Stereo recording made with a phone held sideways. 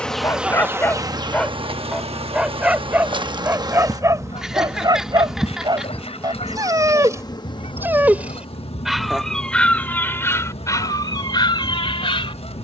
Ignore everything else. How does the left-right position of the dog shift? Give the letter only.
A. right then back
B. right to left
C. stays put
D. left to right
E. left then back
A.